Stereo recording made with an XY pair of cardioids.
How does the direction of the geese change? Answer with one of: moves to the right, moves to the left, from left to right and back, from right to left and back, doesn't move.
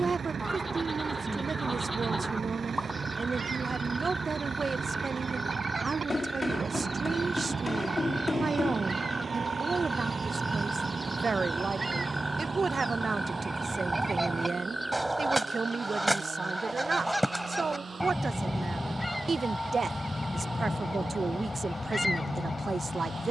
moves to the left.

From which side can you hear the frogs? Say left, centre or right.
centre.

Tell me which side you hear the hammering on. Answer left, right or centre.
left.